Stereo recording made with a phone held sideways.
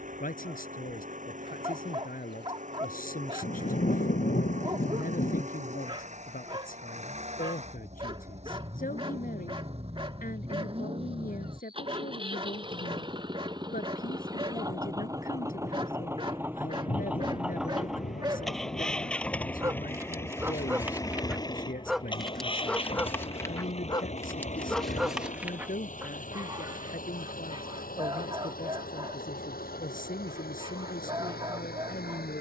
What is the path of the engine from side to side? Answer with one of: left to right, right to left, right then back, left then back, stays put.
right to left.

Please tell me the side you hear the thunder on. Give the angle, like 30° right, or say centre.
60° left.